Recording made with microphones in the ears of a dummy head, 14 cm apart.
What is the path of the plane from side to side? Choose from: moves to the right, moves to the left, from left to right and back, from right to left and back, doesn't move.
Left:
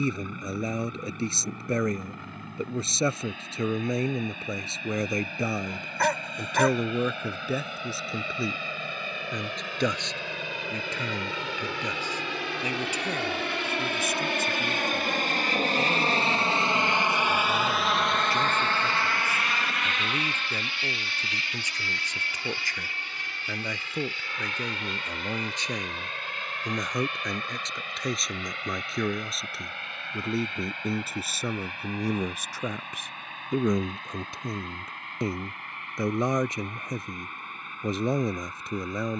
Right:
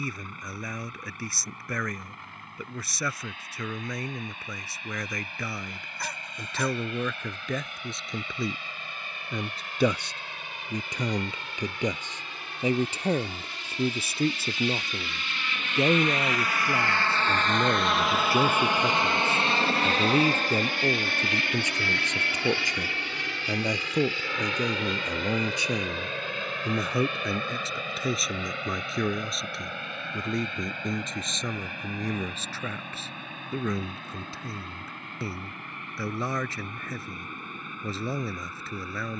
moves to the right.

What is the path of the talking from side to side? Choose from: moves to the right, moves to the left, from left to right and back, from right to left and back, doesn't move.
from left to right and back.